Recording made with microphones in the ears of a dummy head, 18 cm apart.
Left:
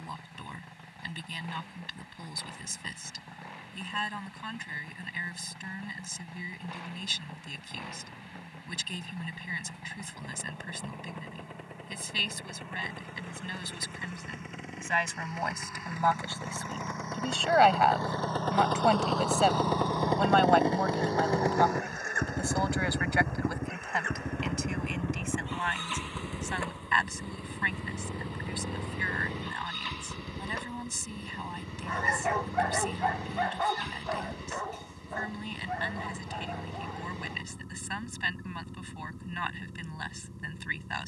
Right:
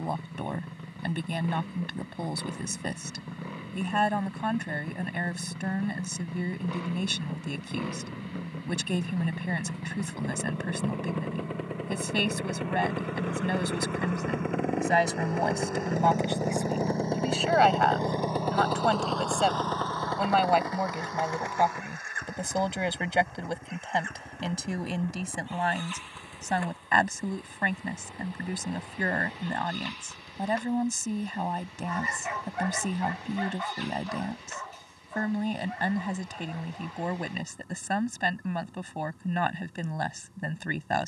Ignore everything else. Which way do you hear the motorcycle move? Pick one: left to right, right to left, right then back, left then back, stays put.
right to left.